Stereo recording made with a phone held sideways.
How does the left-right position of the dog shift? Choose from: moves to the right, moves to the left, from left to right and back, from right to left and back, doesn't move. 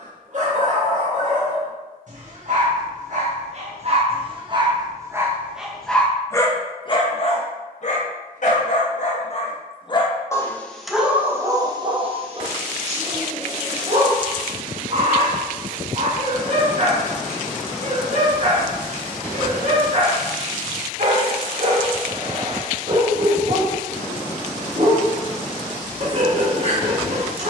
from right to left and back.